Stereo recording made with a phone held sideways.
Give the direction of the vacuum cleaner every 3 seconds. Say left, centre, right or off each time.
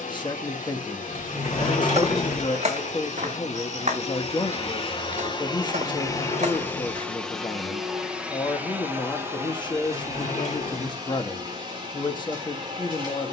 left, left, centre, right, right.